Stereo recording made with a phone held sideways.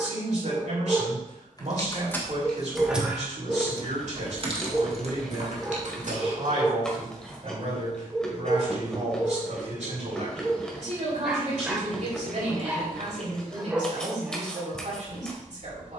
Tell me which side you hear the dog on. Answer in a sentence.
You can hear the dog in the centre.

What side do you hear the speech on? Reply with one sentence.
You can hear the speech on the right.